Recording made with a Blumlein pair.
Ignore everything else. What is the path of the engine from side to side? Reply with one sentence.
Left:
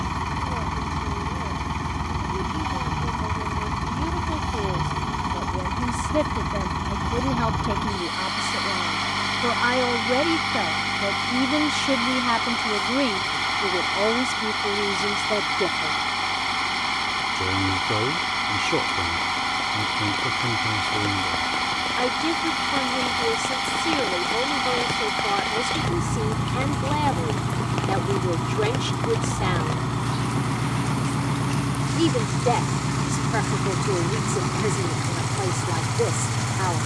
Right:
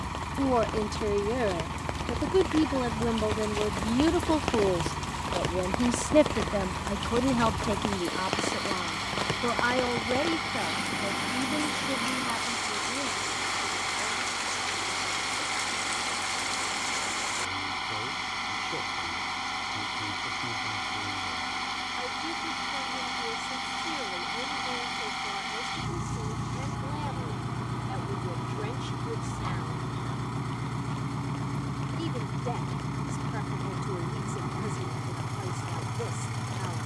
You can hear the engine stay in one place.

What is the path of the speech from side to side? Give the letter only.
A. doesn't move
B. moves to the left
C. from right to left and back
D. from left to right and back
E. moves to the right
B.